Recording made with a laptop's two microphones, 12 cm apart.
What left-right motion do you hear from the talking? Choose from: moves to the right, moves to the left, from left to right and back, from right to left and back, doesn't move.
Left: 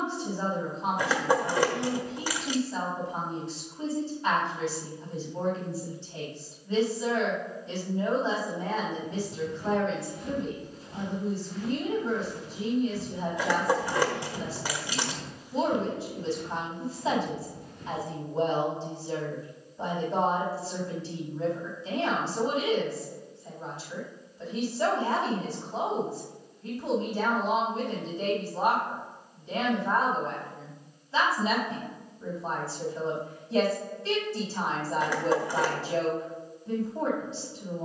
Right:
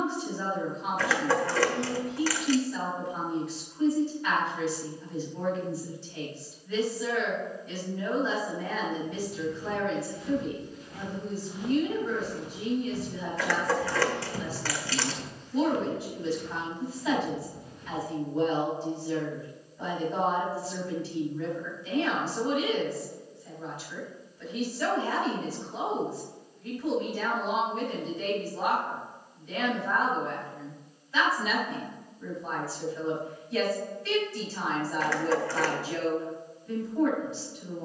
doesn't move.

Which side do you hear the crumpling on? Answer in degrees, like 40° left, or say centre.
20° left.